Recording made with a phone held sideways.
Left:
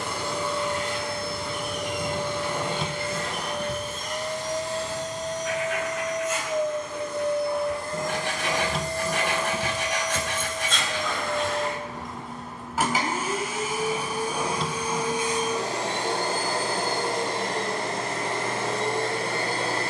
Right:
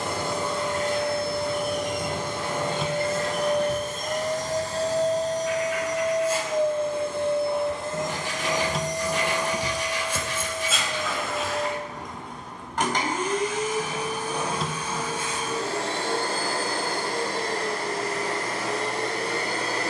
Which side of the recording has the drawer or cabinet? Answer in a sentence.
In this clip you hear the drawer or cabinet in the centre.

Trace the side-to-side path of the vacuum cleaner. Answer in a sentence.
You can hear the vacuum cleaner move from right to left.